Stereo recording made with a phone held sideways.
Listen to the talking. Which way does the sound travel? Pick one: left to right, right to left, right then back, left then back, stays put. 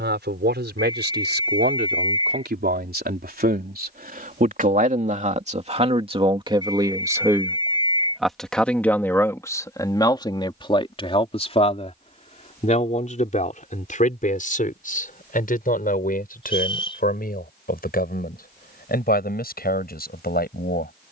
right to left.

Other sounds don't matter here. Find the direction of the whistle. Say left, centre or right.
left.